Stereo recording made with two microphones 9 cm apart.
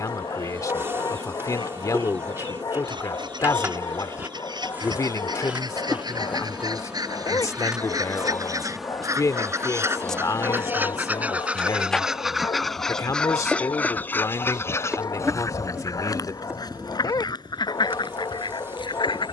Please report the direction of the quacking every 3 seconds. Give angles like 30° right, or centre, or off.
60° right, 60° right, 50° right, 20° right, 10° left, 50° left, 60° left.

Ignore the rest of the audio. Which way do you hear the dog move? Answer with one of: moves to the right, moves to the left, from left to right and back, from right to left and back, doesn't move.
doesn't move.